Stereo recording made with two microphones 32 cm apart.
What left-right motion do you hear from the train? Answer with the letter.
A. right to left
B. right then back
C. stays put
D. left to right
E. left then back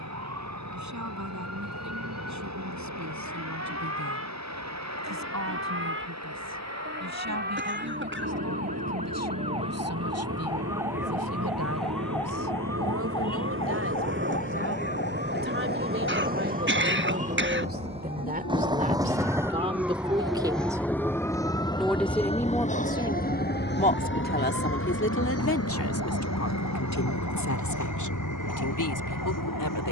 A.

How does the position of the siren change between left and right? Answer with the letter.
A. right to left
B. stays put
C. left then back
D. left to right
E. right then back
A.